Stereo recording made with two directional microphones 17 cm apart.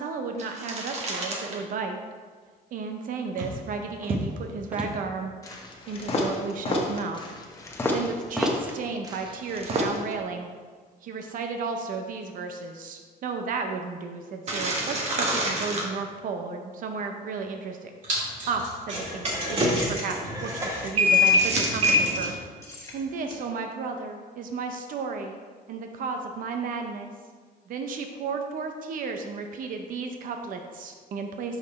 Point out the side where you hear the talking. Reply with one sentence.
In this clip you hear the talking on the right.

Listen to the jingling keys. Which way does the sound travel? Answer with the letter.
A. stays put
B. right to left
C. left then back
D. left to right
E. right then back
B.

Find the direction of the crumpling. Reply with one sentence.
You can hear the crumpling on the right.